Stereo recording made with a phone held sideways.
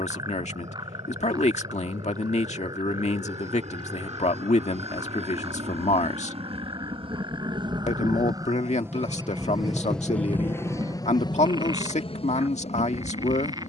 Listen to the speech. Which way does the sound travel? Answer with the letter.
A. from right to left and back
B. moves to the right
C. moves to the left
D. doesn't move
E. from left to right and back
D.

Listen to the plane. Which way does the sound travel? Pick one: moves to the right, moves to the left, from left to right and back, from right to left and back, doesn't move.
moves to the left.